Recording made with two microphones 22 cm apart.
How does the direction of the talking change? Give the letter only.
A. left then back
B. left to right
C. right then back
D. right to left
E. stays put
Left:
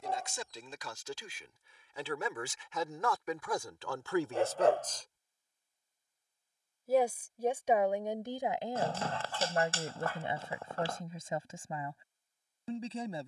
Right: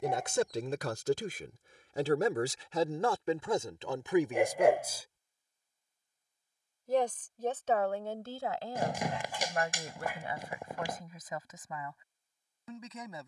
D.